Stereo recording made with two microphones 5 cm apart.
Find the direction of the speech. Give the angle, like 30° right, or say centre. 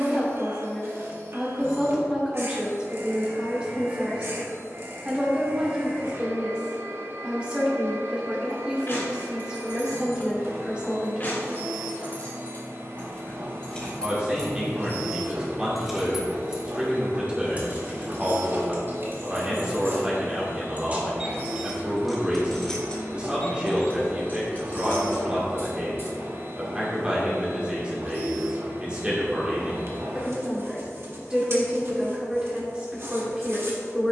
20° right.